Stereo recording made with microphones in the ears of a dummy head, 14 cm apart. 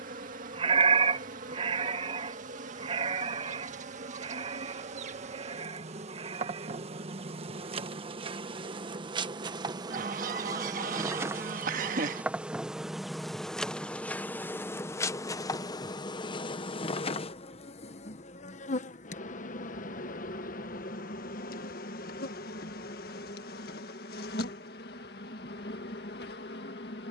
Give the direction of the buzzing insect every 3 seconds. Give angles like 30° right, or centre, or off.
50° right, 50° right, 40° right, 20° right, centre, 30° left, 50° left, 70° left, 70° left.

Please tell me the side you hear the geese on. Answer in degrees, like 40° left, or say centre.
60° right.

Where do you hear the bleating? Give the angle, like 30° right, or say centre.
40° right.